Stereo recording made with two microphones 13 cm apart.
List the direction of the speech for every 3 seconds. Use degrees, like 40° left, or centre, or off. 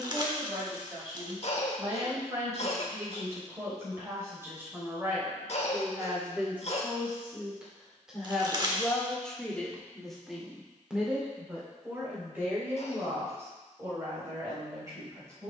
30° right, 20° right, 10° right, centre, 20° right.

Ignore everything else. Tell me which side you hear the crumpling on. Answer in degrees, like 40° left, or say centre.
30° right.